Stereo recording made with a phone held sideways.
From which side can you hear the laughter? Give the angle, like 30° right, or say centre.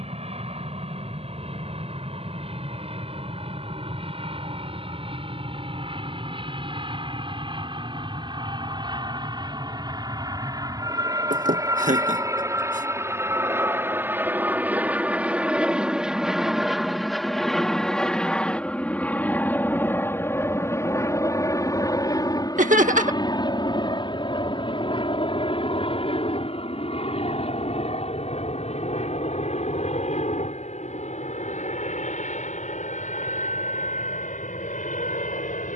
80° right.